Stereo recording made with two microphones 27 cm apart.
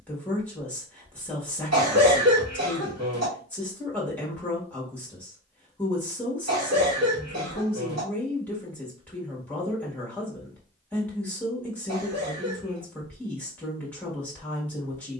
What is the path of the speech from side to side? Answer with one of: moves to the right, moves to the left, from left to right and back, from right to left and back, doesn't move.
doesn't move.